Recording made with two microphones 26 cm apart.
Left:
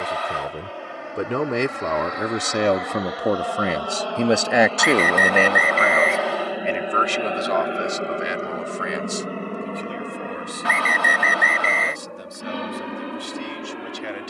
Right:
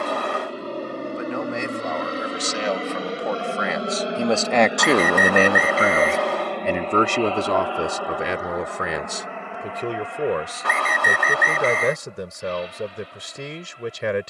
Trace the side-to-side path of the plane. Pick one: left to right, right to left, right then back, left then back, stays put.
right to left.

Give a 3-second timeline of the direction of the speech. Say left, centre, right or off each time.
left, centre, right, right, right.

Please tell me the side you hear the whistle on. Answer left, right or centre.
right.